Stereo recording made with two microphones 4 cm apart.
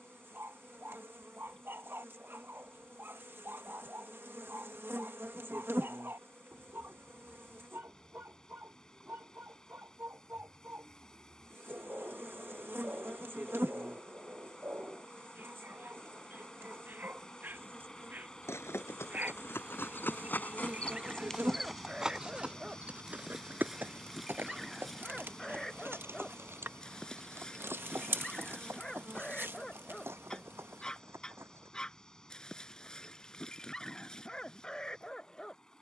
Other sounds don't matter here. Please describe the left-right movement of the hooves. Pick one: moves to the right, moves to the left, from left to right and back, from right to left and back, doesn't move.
moves to the right.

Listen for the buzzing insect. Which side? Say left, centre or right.
right.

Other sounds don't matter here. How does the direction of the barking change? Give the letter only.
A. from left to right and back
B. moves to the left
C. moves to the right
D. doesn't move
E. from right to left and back
B.